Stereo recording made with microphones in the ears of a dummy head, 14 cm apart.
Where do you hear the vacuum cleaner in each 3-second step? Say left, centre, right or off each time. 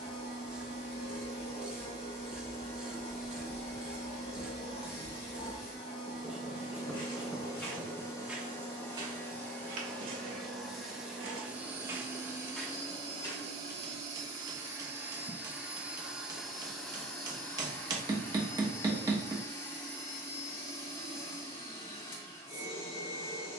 left, left, left, centre, right, centre, left, left.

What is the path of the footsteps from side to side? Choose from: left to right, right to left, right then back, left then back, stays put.
right then back.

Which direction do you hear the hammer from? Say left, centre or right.
right.